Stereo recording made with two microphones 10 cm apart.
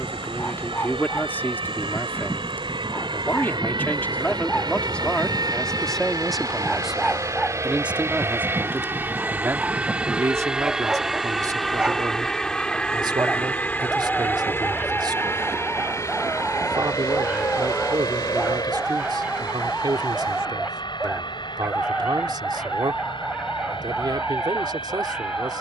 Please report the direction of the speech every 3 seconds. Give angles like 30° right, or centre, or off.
20° left, 10° left, 10° right, 30° right, 50° right, 50° right, 50° right, 50° right, 50° right.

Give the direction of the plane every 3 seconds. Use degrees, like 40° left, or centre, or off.
60° right, 50° right, 30° right, 10° right, 10° left, 30° left, 40° left, 50° left, 50° left.